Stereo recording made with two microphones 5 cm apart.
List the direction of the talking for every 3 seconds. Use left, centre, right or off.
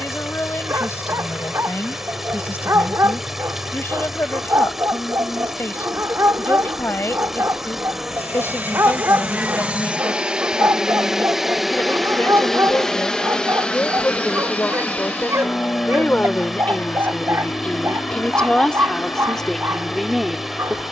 left, left, left, left, left, left, centre.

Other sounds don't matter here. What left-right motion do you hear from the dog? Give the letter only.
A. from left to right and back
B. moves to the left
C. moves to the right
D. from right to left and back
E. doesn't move
E.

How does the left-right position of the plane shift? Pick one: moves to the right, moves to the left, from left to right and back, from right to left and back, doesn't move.
moves to the left.